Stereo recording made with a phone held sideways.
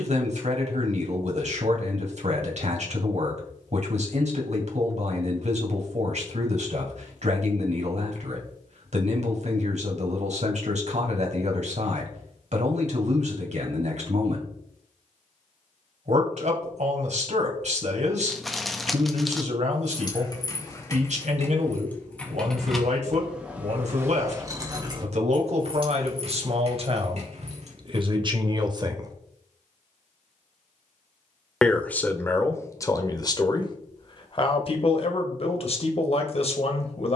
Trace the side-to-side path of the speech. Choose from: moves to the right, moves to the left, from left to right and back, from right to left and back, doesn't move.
moves to the left.